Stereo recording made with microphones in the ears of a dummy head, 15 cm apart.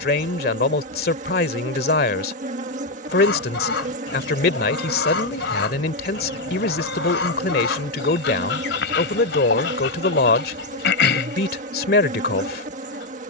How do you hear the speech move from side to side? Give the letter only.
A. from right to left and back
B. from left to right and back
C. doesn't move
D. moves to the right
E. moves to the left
C.